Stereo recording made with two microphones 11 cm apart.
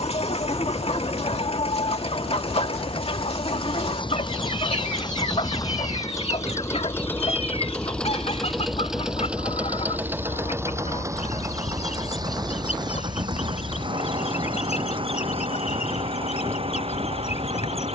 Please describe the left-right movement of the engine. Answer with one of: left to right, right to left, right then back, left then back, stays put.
left to right.